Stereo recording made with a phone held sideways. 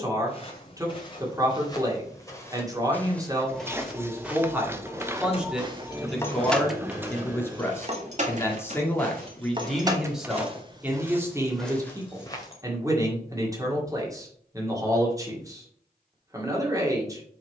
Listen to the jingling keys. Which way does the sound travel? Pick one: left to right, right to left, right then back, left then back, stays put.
right then back.